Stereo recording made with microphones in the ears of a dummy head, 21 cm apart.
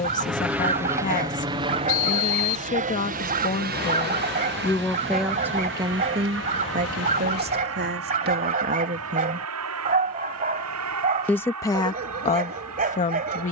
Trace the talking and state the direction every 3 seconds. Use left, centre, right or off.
left, centre, right, centre, left.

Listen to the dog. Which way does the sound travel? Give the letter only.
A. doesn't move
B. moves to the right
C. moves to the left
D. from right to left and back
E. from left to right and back
A.